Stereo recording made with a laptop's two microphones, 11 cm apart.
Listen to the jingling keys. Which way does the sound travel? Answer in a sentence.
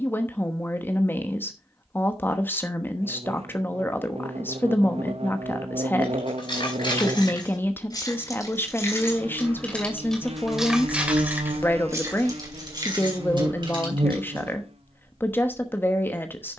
You can hear the jingling keys move to the right.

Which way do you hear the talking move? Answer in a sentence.
You can hear the talking stay in one place.